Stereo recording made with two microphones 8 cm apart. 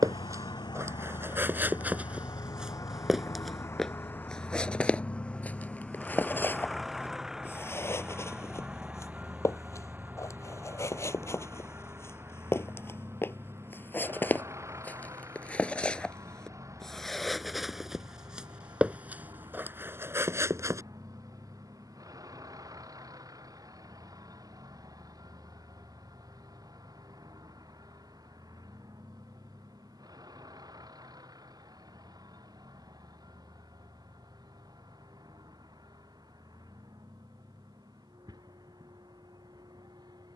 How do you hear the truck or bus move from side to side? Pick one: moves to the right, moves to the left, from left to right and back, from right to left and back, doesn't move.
moves to the right.